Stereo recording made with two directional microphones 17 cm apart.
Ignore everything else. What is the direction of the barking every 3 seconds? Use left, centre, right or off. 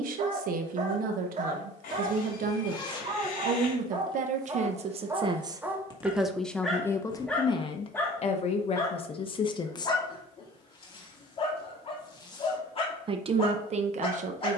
right, right, centre, left, left.